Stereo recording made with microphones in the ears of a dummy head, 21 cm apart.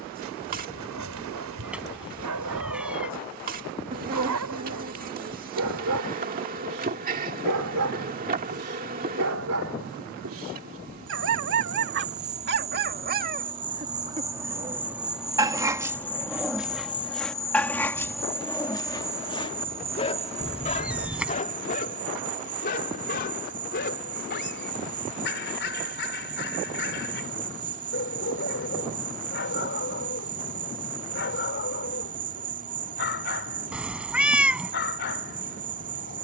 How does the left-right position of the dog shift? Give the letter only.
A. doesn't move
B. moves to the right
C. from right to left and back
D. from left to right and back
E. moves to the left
E.